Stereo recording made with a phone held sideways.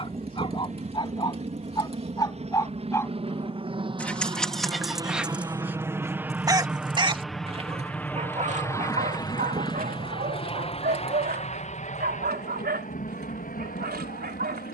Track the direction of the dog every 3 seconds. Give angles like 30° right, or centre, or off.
30° left, centre, 40° right, 60° right, 80° right.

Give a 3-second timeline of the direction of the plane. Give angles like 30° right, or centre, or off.
50° right, 30° right, centre, 30° left, 50° left.